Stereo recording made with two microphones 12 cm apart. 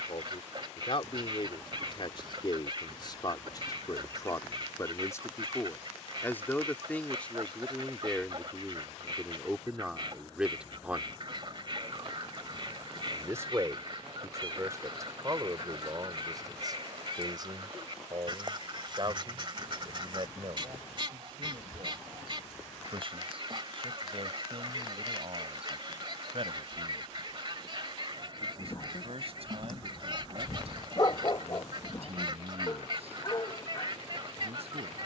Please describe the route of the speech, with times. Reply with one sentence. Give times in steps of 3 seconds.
You can hear the speech on the left from 0 s, in the centre from 6 s and on the right from 12 s.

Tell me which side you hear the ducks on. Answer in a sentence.
You can hear the ducks on the right.